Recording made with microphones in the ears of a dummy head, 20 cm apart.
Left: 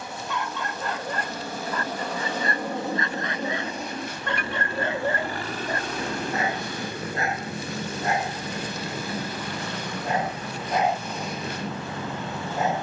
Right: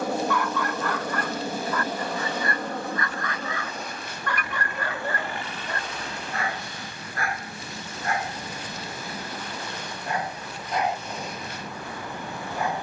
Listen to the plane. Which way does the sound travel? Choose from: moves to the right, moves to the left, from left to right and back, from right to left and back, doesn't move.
moves to the left.